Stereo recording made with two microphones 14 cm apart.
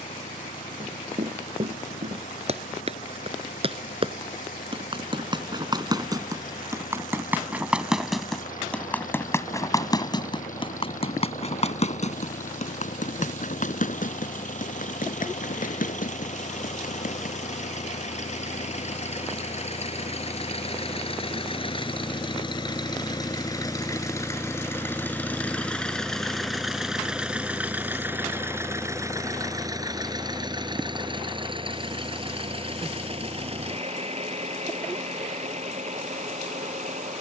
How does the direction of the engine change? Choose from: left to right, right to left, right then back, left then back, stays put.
left to right.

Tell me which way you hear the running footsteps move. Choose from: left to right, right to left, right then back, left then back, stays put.
right to left.